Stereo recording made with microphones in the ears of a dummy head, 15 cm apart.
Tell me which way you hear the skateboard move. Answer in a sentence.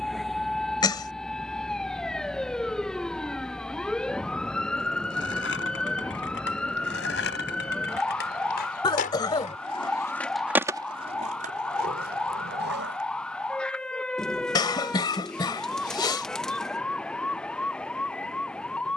In this clip you hear the skateboard move from left to right.